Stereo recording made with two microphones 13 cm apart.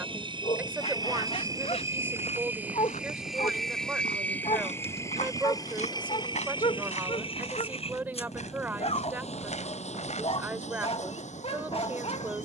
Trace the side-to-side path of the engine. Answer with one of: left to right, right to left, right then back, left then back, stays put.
right to left.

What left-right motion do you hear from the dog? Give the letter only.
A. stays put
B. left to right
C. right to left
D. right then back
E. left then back
A.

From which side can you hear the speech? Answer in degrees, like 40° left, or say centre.
10° right.